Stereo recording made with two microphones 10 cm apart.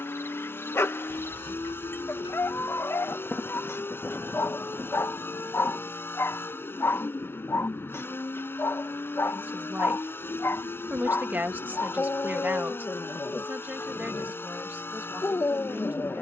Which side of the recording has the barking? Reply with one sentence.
In this clip you hear the barking on the left.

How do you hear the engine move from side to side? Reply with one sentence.
You can hear the engine stay in one place.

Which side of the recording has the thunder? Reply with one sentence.
You can hear the thunder in the centre.